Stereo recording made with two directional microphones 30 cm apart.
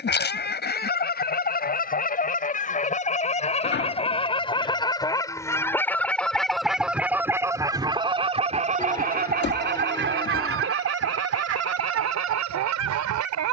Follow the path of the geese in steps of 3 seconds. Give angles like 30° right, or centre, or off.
30° left, 20° left, 10° right, 40° right, 70° right.